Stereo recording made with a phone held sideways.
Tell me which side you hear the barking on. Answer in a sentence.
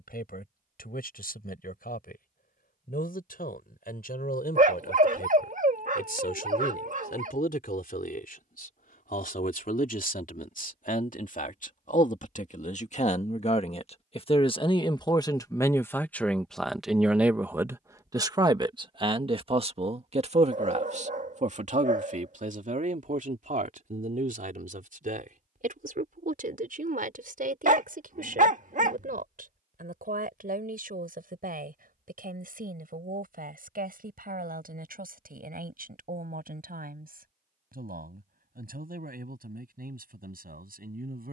You can hear the barking on the right.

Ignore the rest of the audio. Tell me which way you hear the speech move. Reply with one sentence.
In this clip you hear the speech move from left to right.